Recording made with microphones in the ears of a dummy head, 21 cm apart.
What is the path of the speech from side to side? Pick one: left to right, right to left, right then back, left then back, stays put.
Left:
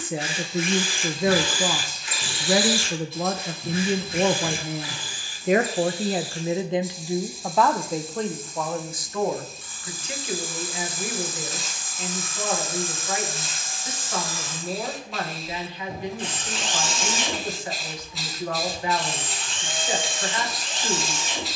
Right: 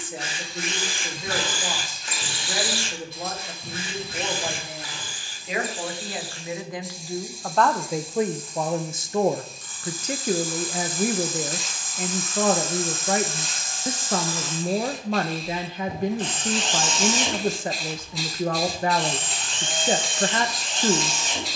left to right.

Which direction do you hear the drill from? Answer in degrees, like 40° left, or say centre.
40° right.